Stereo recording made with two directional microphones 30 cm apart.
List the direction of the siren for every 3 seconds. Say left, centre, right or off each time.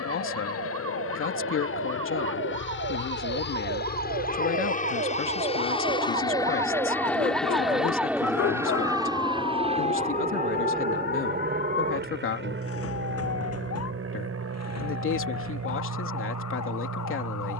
right, right, centre, left, left, left.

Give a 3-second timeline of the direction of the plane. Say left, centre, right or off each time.
left, left, centre, right, right, right.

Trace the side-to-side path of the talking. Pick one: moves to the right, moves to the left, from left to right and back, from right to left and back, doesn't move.
doesn't move.